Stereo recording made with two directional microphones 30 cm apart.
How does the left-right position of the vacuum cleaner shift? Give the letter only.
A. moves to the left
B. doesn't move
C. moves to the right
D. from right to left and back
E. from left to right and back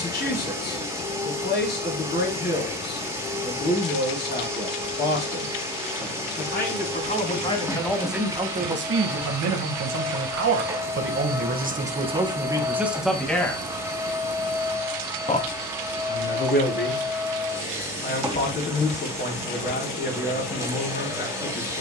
B.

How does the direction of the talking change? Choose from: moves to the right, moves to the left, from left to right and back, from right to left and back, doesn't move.
from left to right and back.